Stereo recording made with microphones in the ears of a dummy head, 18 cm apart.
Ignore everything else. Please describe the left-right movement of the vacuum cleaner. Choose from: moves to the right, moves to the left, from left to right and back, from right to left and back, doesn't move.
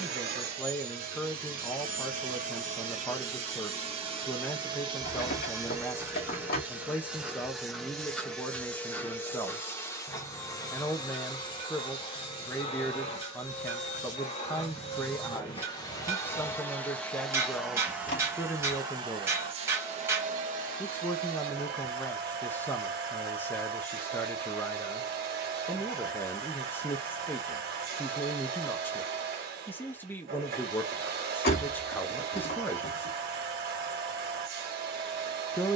from right to left and back.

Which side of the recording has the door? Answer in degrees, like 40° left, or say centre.
50° left.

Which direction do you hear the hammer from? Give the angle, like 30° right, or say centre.
10° right.